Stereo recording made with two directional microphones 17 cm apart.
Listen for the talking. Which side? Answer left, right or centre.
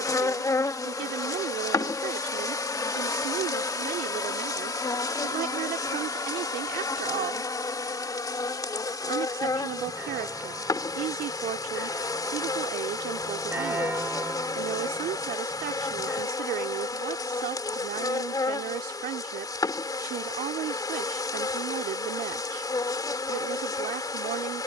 right.